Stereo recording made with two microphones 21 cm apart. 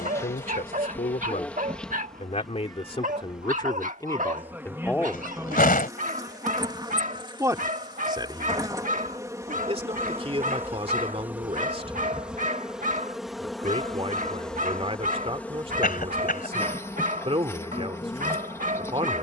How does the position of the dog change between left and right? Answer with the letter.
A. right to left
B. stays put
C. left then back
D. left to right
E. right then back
B.